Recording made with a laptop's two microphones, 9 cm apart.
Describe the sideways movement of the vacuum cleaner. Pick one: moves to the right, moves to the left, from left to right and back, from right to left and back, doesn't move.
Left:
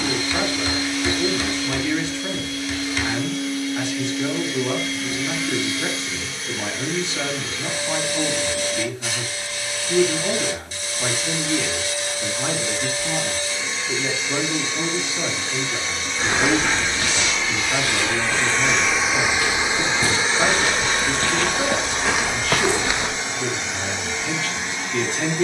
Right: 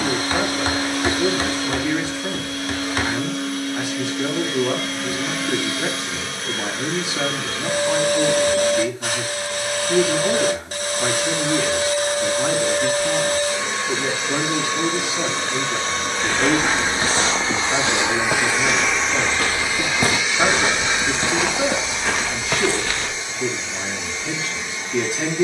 moves to the left.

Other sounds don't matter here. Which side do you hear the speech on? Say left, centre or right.
centre.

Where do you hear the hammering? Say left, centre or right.
right.